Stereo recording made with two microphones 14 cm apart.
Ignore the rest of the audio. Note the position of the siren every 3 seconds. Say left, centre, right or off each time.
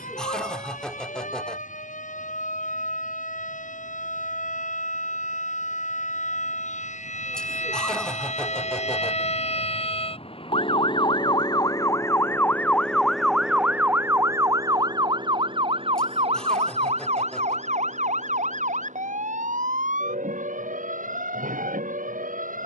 left, left, left, left, centre, right, right, right.